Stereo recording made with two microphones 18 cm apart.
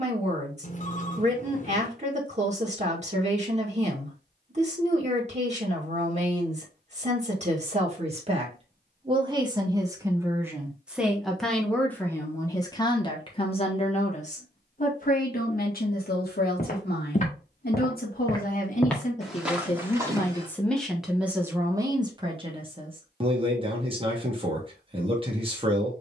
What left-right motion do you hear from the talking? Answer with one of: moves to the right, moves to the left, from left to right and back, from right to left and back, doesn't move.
from right to left and back.